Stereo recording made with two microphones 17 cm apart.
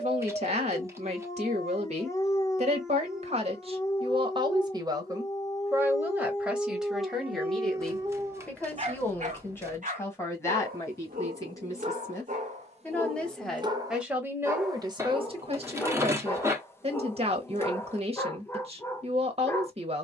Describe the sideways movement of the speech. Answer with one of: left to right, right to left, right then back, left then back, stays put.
left then back.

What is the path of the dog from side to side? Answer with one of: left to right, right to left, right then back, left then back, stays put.
right then back.